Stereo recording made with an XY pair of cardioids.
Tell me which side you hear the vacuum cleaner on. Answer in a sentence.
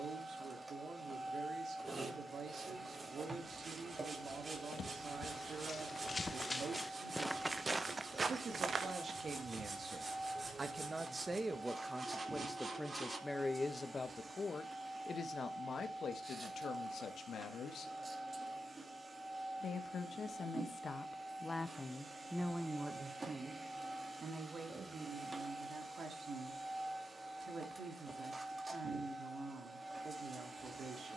You can hear the vacuum cleaner on the right.